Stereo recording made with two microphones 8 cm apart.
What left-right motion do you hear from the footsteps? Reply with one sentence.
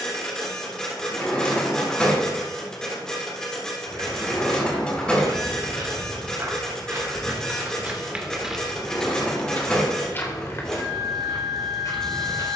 You can hear the footsteps move from right to left.